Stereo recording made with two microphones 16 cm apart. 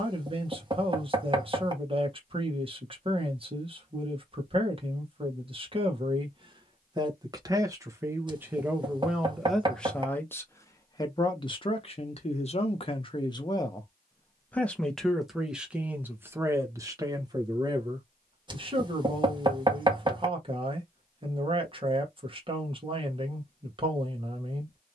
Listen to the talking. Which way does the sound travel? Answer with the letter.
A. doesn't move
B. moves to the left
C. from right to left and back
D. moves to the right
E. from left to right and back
C.